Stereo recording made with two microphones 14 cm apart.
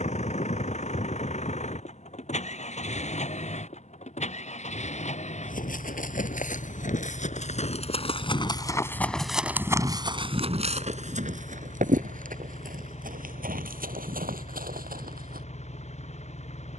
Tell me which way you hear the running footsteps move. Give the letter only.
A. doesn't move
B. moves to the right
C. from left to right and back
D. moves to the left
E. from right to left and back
B.